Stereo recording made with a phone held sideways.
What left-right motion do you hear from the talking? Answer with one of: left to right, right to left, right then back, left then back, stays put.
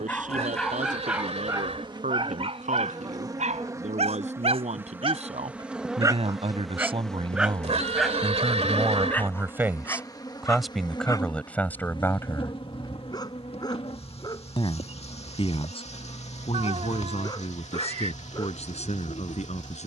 right to left.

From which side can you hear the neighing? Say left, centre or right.
right.